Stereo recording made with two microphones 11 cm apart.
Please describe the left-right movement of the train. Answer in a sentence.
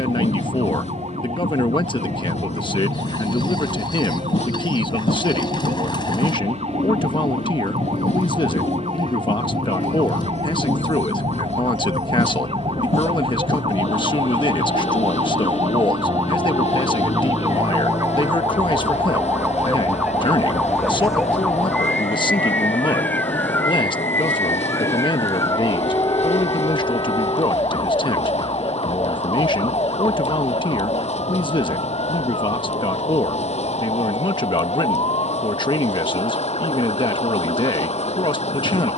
In this clip you hear the train stay in one place.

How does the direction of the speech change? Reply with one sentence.
In this clip you hear the speech stay in one place.